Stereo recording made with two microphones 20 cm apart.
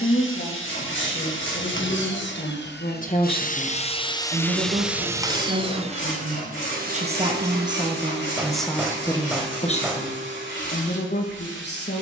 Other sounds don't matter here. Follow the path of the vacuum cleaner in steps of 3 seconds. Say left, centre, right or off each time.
left, centre, right, right.